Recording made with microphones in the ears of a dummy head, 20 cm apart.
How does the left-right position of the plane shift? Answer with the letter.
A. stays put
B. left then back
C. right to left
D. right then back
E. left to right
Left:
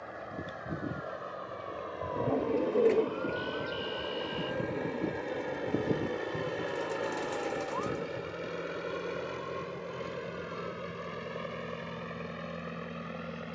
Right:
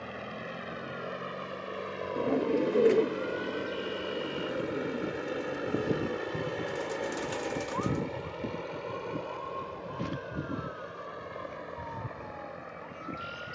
C.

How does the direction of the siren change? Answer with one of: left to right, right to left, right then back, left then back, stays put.
left to right.